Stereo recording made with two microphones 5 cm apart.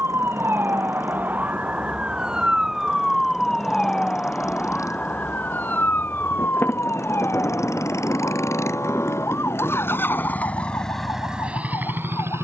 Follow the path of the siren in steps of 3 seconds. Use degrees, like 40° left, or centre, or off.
30° right, 20° left, 50° left, 60° left.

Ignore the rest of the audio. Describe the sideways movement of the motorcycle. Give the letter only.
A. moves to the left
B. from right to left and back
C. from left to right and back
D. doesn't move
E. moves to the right
E.